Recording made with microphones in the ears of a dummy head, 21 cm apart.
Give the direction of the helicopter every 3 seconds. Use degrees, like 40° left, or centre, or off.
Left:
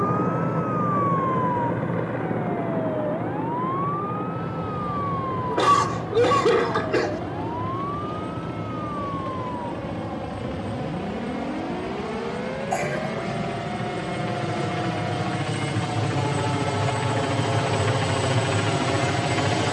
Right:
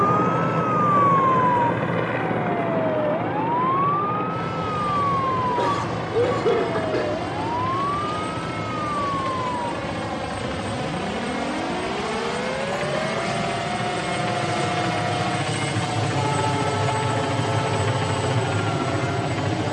60° right, 60° right, 60° right, 50° right, 40° right, 10° right, 10° left.